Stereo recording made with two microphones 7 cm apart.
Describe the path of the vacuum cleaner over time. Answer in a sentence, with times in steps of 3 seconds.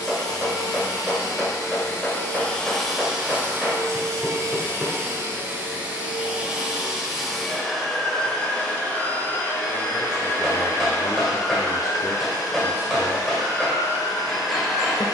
You can hear the vacuum cleaner on the left from 0 s, on the right from 3 s, in the centre from 6 s and on the left from 9 s.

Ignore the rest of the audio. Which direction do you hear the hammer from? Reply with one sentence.
In this clip you hear the hammer in the centre.